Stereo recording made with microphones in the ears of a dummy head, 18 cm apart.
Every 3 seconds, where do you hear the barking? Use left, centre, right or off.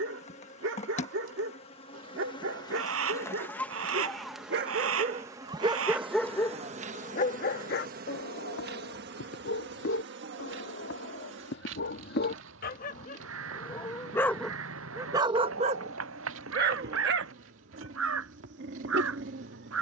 right, right, left, left, left, right, right.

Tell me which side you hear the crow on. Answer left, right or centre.
right.